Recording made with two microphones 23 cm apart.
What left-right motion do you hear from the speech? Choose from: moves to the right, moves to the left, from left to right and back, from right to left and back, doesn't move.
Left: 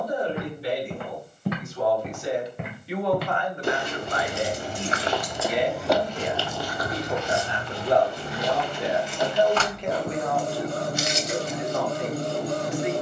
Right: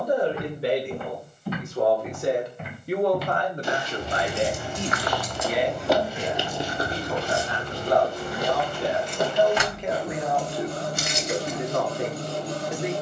from right to left and back.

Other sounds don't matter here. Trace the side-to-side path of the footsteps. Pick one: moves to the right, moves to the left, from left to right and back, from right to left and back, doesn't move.
moves to the right.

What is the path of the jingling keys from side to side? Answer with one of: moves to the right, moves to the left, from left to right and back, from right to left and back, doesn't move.
from right to left and back.